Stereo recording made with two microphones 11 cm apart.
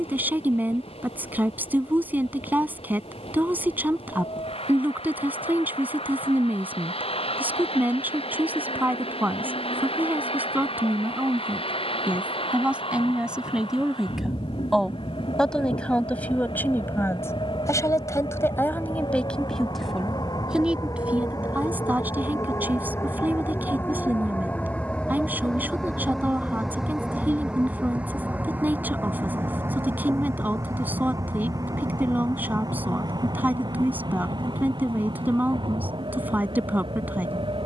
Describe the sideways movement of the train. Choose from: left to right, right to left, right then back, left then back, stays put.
left to right.